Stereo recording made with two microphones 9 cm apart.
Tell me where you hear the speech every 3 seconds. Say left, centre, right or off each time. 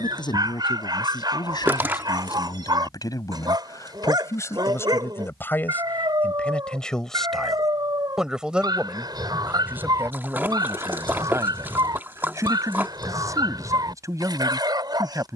left, left, centre, right, right.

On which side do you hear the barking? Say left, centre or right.
right.